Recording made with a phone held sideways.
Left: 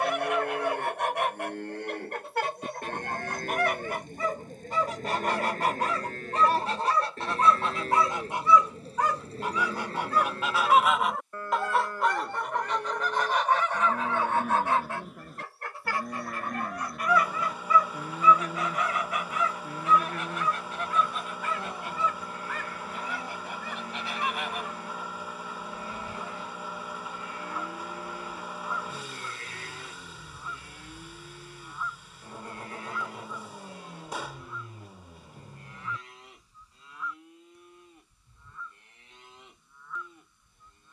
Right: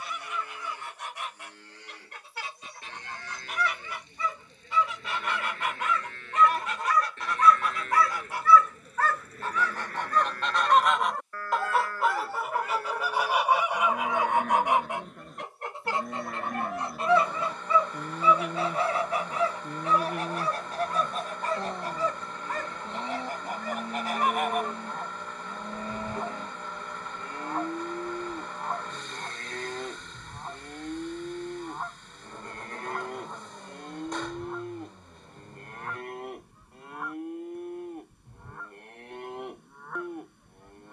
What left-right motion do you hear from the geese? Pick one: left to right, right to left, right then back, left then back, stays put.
left to right.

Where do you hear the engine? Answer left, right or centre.
centre.